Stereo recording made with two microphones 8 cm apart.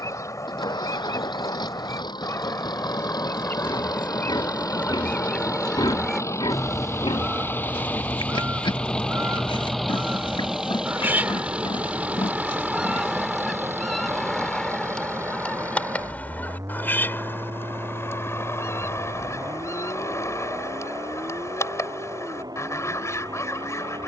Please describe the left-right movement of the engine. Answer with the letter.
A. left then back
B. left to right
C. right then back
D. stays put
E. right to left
B.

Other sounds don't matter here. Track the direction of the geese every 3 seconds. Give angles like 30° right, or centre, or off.
40° left, 20° left, 20° right, 30° right, centre, 20° left, 40° left, 40° left.